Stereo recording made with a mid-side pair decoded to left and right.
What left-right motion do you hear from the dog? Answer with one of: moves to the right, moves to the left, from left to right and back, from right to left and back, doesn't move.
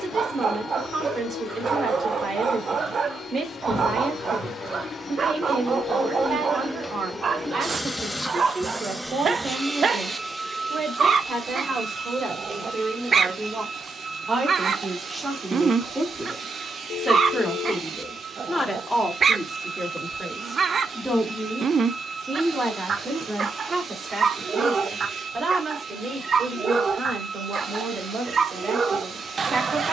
doesn't move.